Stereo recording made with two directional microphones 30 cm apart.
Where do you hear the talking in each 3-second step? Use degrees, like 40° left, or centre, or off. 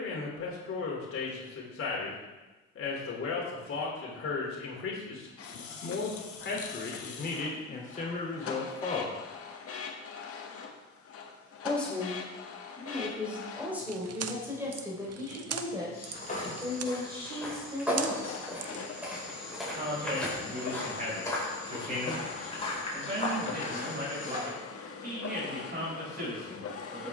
50° left, 50° left, 30° left, 10° left, 10° right, 20° right, 20° right, 30° right, 30° right.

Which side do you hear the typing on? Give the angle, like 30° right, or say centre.
60° right.